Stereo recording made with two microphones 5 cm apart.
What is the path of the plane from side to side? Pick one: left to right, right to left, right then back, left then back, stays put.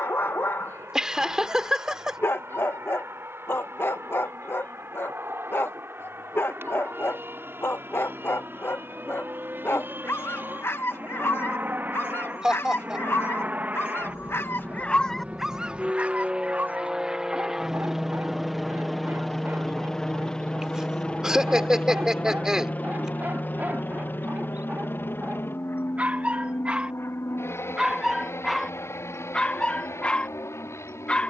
right to left.